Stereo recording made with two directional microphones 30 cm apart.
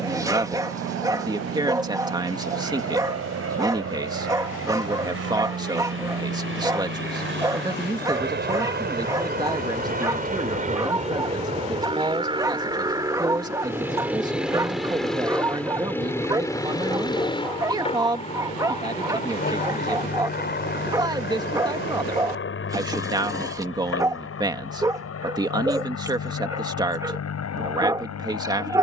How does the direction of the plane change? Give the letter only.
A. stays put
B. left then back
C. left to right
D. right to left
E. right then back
D.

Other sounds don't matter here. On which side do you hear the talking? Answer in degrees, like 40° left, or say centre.
10° right.